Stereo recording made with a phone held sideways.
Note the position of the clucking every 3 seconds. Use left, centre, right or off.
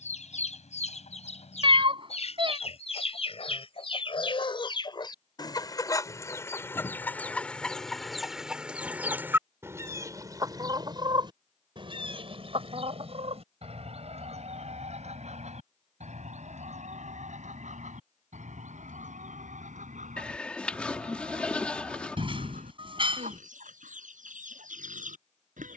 left, left, centre, right, right, right, right, right, right.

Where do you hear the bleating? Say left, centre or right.
centre.